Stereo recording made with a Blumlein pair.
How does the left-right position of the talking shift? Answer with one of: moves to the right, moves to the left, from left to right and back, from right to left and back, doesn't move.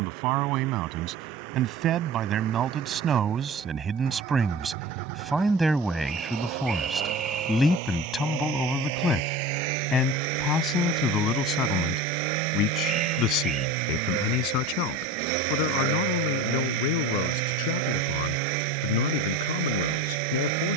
moves to the left.